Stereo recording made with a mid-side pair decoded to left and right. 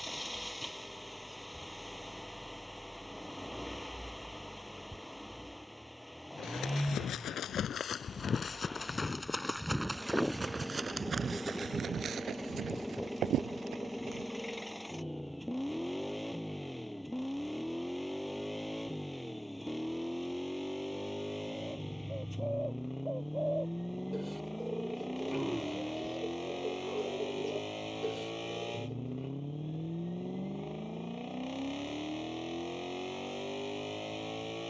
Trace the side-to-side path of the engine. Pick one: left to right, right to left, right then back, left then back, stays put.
stays put.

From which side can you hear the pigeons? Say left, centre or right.
centre.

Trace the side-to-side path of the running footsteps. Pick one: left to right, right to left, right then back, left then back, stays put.
left to right.